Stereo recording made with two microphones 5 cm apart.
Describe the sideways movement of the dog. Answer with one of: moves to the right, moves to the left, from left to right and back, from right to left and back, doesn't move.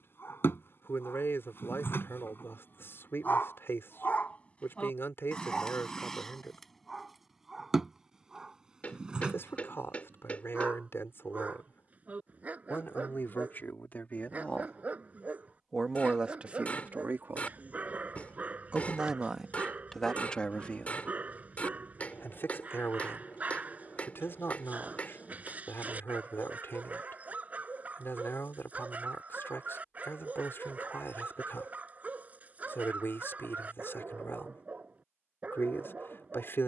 moves to the right.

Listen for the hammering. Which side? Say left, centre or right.
left.